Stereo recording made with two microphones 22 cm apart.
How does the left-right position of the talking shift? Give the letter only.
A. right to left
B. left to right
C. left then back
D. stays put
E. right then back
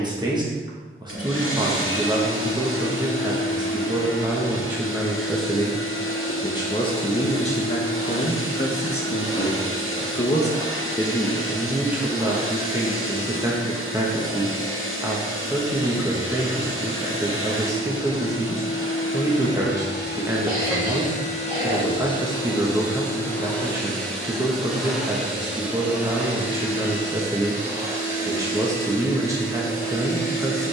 C.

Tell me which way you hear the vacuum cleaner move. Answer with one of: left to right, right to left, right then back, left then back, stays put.
left to right.